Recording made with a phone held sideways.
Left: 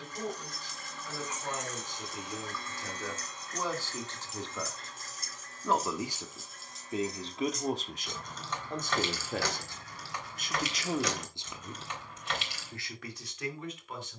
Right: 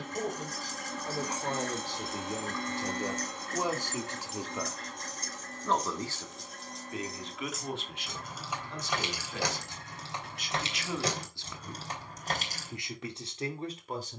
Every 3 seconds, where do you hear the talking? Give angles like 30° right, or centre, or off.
40° right, 10° right, 40° left, 40° left, 30° right.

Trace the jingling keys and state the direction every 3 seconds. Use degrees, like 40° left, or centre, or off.
30° right, centre, centre, 30° right, 40° right.